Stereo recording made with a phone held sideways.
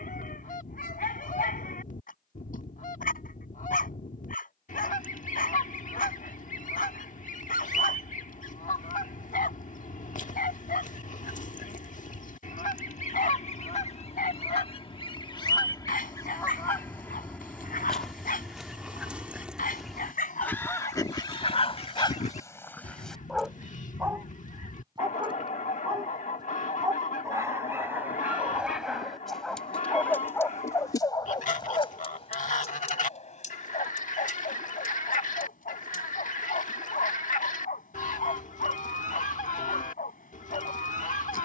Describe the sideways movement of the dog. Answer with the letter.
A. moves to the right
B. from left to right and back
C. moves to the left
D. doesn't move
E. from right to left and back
B.